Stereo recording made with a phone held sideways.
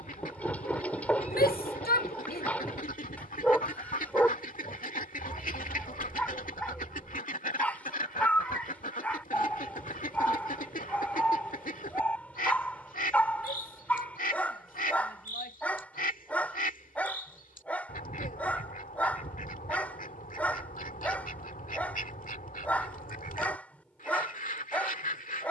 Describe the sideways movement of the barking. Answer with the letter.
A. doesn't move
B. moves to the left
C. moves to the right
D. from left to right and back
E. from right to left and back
A.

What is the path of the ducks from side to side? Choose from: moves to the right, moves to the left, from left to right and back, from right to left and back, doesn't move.
doesn't move.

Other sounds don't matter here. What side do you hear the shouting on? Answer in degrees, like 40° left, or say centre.
80° left.